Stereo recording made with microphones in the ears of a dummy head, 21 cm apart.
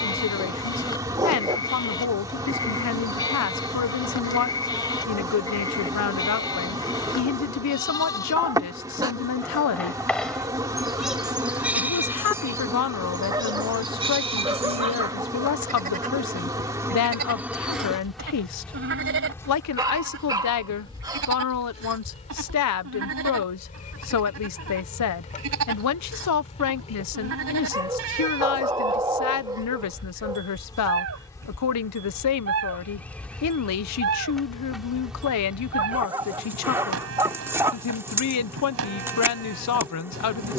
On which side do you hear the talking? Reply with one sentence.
In this clip you hear the talking on the left.